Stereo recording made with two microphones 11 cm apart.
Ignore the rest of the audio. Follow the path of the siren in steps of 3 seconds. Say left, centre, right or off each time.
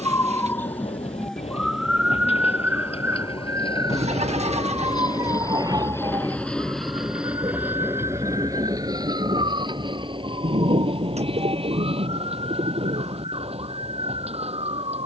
centre, right, right, right, right.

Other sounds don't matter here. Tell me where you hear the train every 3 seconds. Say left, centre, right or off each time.
left, left, centre, right, right.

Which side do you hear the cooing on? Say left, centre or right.
right.